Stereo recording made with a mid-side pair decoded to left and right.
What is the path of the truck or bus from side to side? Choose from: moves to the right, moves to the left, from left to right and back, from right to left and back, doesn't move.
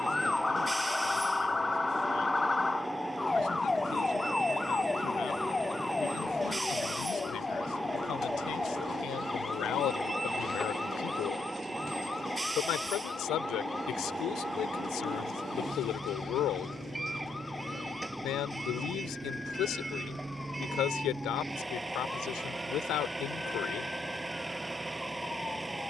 doesn't move.